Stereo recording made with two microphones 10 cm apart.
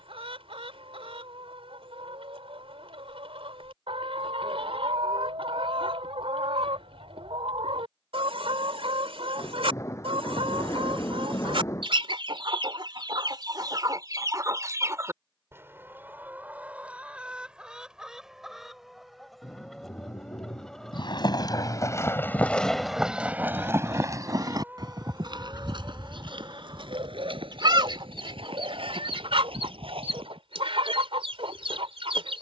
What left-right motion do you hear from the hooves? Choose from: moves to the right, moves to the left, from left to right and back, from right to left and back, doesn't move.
moves to the right.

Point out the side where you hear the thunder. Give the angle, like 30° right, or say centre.
30° left.